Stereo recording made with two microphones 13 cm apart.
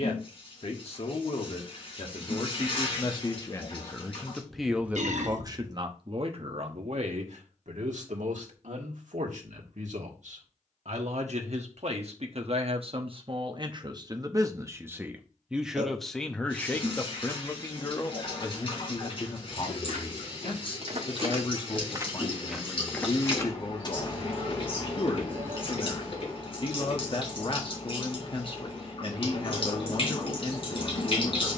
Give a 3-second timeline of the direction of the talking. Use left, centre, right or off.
left, centre, right, right, right, centre, left, left, left, left, left.